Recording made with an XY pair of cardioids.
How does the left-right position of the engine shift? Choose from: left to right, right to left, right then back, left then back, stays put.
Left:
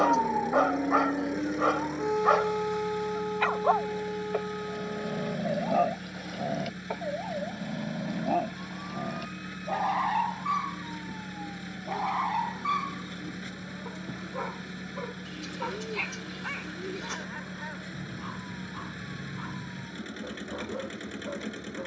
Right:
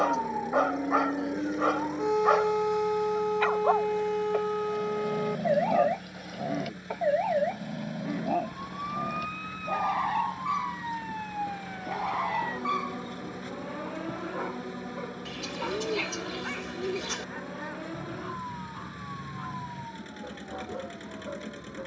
stays put.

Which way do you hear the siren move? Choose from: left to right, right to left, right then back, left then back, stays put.
left to right.